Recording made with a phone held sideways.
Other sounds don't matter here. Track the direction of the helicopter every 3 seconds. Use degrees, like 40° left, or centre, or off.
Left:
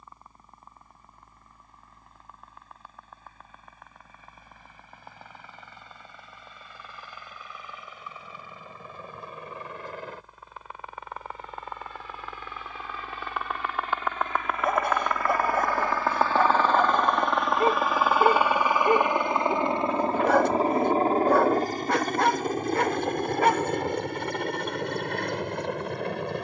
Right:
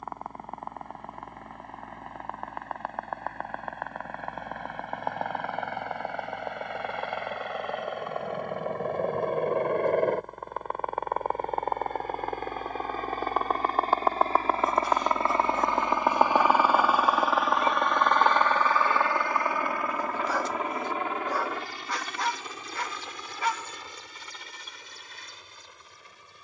70° right, 70° right, 60° right, 50° right, 40° right, 10° right, 20° left, 40° left, 60° left.